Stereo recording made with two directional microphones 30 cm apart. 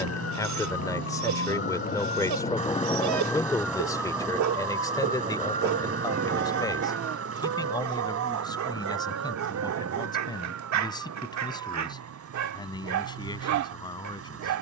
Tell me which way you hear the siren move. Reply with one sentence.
You can hear the siren go from the left side to the right.